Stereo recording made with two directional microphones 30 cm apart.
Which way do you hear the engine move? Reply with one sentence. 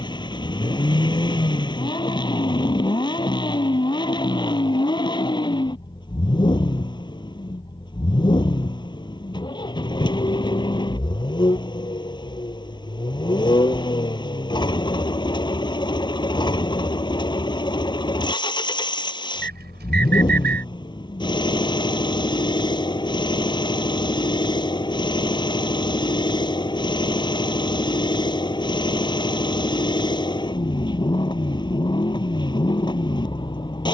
In this clip you hear the engine stay in one place.